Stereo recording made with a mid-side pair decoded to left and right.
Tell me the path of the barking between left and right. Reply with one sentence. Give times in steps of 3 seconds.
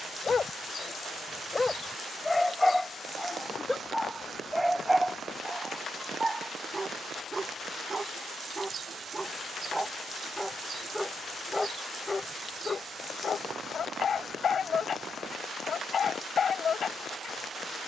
You can hear the barking on the left from 0 s, in the centre from 3 s, on the right from 6 s, in the centre from 9 s and on the left from 12 s.